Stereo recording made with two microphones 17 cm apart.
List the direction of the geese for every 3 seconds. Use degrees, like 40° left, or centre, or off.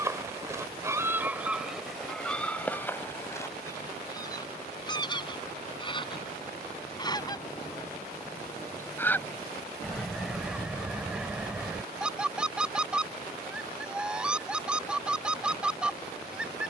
centre, 20° left, 20° left, centre, centre, centre.